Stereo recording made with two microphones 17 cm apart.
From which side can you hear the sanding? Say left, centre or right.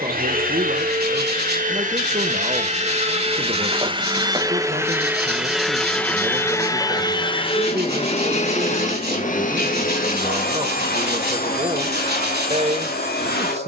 right.